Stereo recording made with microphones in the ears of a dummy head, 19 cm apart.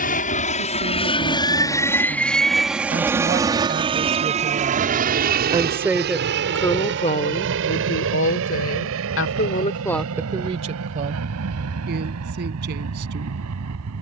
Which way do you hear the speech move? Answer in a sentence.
You can hear the speech move from right to left and back again.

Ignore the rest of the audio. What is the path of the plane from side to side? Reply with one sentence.
You can hear the plane go from the left side to the right.